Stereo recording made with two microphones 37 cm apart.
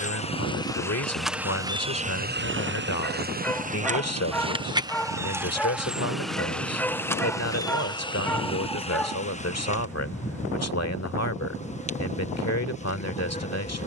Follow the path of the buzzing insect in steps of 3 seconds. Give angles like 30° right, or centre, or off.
10° right, 10° right, 10° left, 20° left, 20° left.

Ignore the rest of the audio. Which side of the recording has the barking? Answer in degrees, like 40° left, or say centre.
centre.